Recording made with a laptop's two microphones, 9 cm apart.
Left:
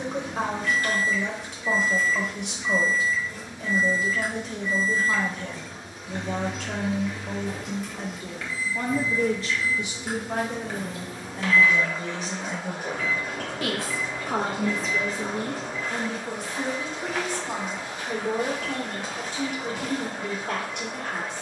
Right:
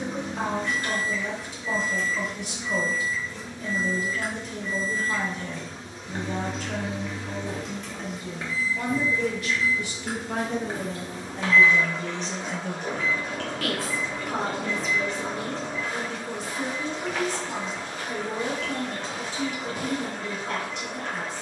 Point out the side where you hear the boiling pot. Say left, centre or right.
centre.